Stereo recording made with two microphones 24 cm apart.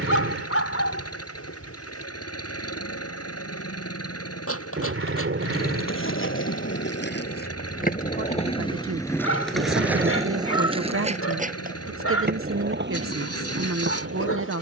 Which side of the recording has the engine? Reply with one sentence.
You can hear the engine on the left.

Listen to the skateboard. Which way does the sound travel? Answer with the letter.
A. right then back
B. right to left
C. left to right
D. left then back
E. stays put
C.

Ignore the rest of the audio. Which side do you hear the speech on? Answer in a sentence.
You can hear the speech on the right.